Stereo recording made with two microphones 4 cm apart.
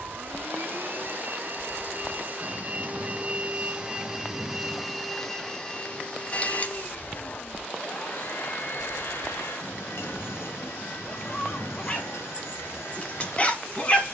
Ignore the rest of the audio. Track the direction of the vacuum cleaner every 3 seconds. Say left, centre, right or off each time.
right, centre, left, left, left.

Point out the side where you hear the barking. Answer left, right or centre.
left.